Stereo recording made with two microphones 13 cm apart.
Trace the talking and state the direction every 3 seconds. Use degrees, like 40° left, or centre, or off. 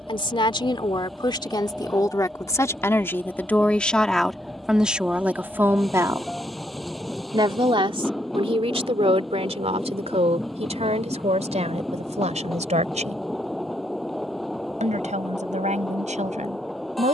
30° left, centre, 40° right, 60° right, 70° right, 80° right.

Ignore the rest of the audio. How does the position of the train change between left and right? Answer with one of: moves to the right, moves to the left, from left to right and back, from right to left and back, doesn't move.
doesn't move.